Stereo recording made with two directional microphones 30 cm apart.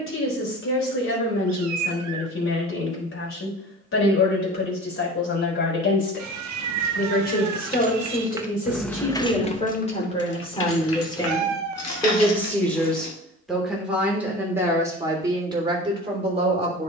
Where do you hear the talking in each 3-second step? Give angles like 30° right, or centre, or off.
40° left, 40° left, 30° left, 20° left, centre, 20° right.